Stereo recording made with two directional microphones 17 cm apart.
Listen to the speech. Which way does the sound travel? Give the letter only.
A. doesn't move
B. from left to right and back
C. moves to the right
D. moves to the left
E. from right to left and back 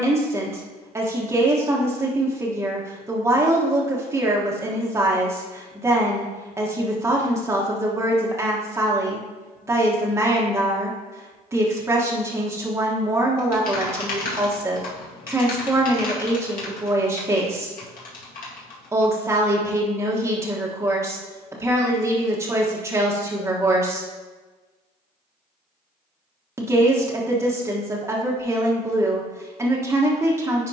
A.